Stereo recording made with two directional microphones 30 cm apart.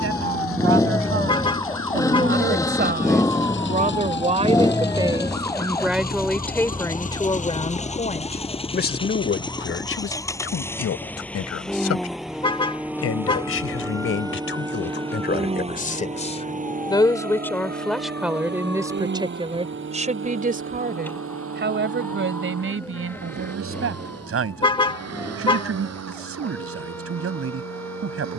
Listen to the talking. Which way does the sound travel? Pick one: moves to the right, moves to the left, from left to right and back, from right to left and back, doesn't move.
from right to left and back.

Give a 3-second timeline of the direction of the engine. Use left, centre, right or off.
left, left, left, centre, centre, right, right, right, right, right.